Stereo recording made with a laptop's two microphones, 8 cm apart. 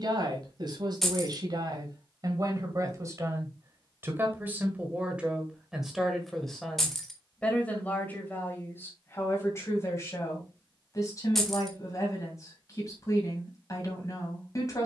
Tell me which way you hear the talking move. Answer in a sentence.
In this clip you hear the talking travel towards the left.